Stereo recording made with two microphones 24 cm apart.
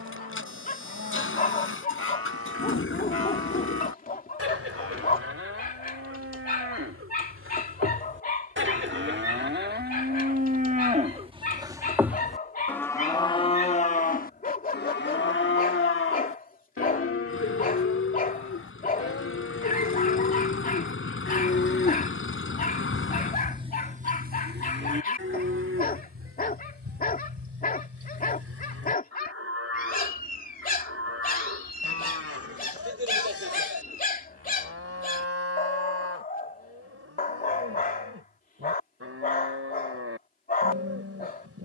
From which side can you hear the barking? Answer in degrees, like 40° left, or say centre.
40° left.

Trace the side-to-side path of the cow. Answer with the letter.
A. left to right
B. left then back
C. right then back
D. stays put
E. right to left
B.